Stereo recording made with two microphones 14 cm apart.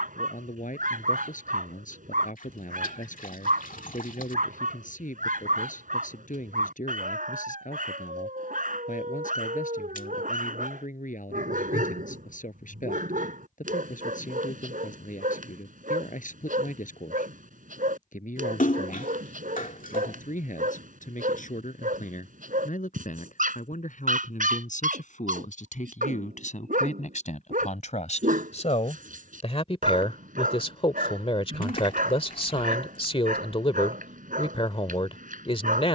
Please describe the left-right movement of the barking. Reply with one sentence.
In this clip you hear the barking stay put.